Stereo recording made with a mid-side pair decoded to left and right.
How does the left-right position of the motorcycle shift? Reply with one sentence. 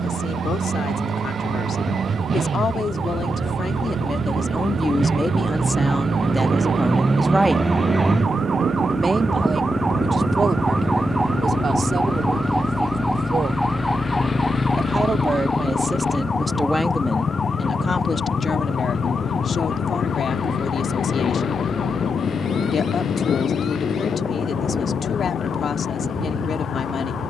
You can hear the motorcycle move to the left.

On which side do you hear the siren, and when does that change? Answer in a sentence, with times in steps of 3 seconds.
You can hear the siren on the right from 0 s, in the centre from 12 s and on the left from 15 s.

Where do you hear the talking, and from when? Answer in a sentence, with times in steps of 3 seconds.
In this clip you hear the talking on the left from 0 s, in the centre from 6 s, on the right from 9 s, in the centre from 15 s and on the left from 18 s.